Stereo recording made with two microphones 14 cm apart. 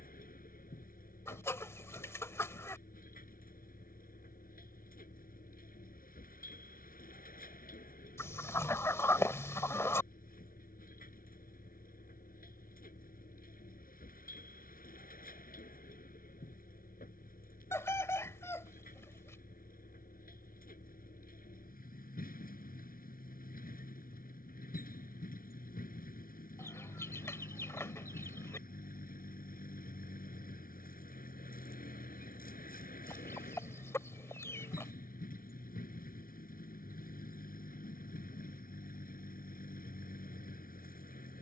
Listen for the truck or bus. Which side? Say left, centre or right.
left.